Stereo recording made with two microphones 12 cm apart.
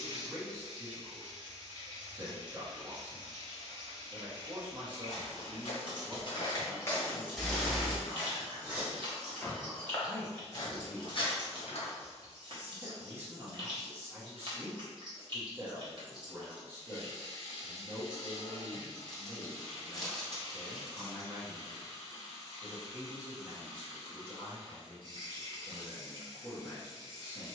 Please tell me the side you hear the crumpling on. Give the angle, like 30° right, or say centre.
centre.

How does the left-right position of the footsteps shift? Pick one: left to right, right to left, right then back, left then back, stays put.
right then back.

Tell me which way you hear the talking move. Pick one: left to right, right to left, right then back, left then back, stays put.
left then back.